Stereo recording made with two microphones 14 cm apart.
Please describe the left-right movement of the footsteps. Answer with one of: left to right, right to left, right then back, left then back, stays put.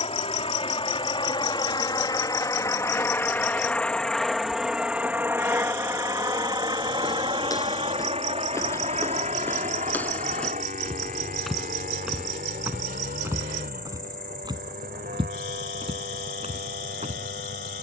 left to right.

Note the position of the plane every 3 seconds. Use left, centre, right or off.
left, centre, right, right, right, right.